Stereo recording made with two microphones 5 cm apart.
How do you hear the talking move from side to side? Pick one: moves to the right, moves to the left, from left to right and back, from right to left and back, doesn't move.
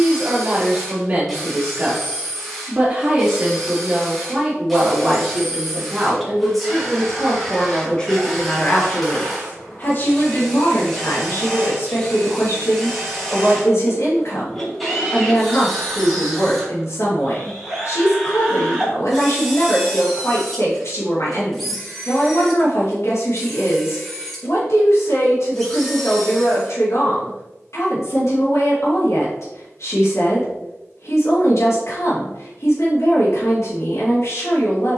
moves to the left.